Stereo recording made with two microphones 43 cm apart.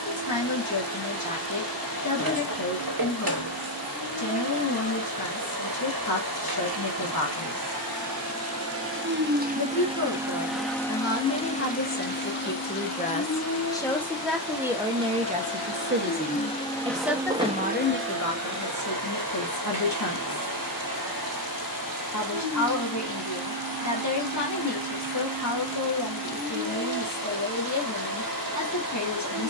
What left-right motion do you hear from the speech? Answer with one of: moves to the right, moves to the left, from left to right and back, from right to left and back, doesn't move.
from left to right and back.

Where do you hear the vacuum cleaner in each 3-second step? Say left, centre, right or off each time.
right, right, right, centre, left, centre, right, right, right, right.